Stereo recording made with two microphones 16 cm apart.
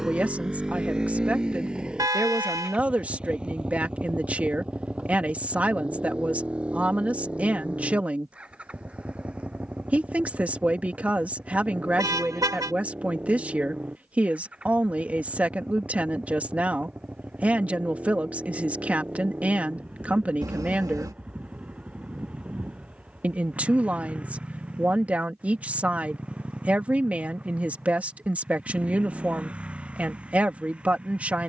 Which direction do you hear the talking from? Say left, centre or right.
centre.